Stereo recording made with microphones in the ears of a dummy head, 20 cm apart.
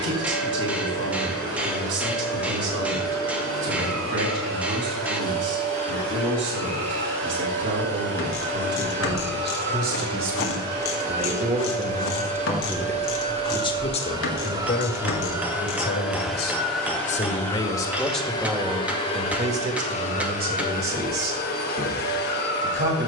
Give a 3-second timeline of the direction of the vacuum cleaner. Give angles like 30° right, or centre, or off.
70° right, 60° right, 60° right, 40° right, 30° right, centre, 30° left, 50° left.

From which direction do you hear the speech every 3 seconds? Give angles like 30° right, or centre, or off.
60° right, 60° right, 60° right, 40° right, 20° left, 40° left, 30° right, 50° right.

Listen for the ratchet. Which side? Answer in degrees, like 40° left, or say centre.
60° left.